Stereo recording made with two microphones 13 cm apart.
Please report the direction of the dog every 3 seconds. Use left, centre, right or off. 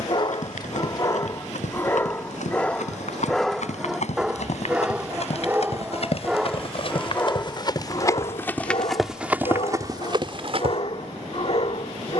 left, centre, left, left.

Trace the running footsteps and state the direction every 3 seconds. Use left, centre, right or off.
left, left, left, right.